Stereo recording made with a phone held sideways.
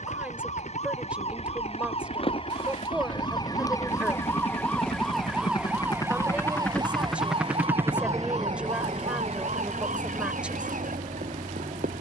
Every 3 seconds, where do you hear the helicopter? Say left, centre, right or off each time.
left, left, centre, right.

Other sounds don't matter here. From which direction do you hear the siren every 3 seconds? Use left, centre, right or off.
left, centre, right, right.